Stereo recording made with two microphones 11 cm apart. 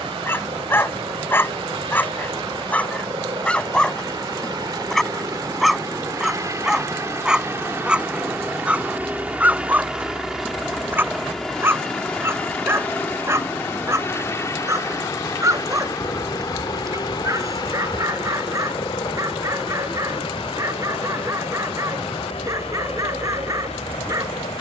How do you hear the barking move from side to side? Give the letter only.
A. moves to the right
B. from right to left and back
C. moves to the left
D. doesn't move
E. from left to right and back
A.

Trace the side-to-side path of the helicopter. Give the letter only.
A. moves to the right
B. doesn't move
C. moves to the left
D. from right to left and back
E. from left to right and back
C.